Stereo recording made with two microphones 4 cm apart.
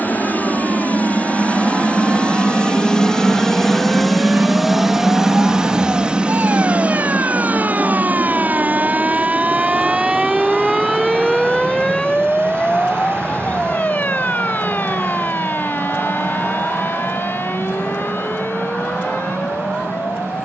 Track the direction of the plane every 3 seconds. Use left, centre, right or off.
left, centre, right, right, right, right, right.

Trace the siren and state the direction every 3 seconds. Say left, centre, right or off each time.
right, right, right, centre, left, left, left.